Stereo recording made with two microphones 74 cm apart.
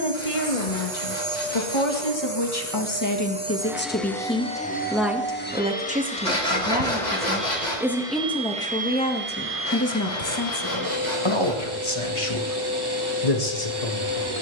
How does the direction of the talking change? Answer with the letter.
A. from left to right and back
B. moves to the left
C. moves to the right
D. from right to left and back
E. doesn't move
A.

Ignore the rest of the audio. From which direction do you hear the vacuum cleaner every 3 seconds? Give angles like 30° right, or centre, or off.
30° right, centre, centre, 20° right, 30° right.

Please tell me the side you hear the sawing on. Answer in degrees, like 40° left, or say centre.
70° left.